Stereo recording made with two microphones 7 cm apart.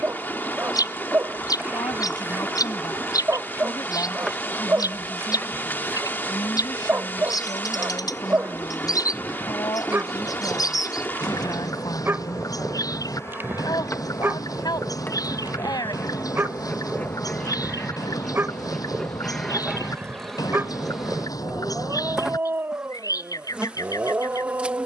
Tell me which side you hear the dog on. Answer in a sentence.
You can hear the dog on the right.